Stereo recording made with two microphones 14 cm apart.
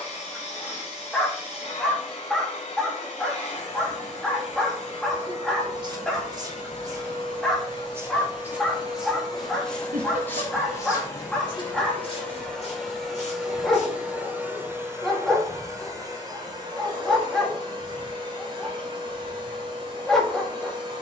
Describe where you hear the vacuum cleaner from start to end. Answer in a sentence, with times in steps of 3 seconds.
You can hear the vacuum cleaner on the left from 0 s, in the centre from 12 s and on the right from 15 s.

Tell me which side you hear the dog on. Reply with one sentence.
In this clip you hear the dog in the centre.